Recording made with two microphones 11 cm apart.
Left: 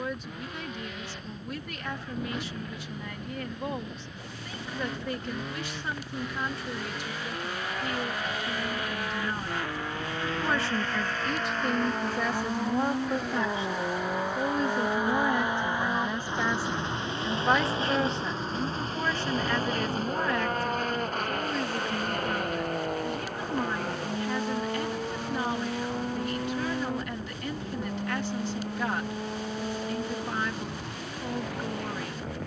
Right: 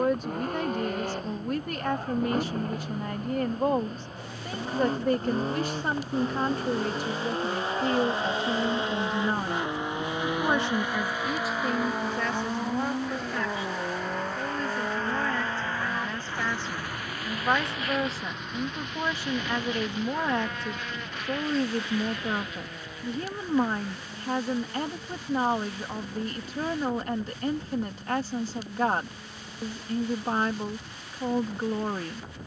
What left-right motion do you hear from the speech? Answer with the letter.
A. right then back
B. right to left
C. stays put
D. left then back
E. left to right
D.